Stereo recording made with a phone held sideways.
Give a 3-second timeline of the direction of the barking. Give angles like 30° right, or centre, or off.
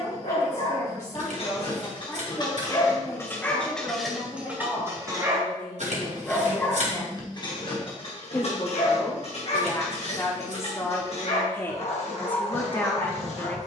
40° left, centre, 30° left, 50° left, 50° left.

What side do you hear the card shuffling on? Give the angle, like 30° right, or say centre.
60° right.